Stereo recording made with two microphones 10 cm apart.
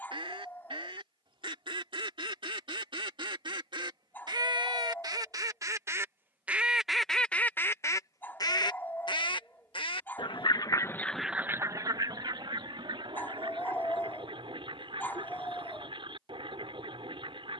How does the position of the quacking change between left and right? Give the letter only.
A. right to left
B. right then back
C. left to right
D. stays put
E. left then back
E.